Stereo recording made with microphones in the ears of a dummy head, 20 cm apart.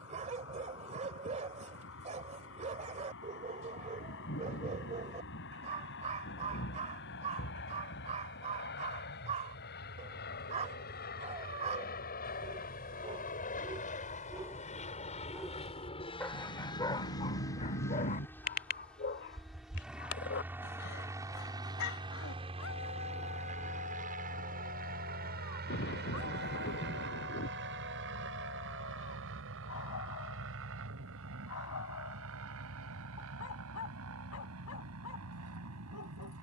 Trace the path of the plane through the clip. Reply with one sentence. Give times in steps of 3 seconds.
You can hear the plane on the left from 0 s, in the centre from 18 s and on the right from 21 s.